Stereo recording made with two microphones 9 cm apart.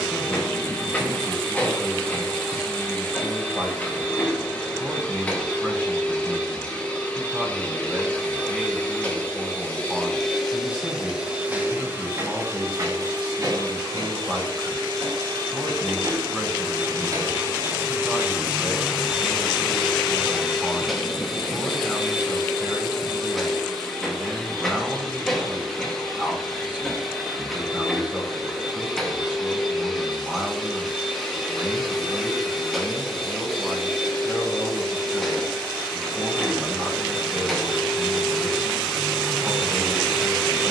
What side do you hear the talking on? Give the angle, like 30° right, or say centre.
10° right.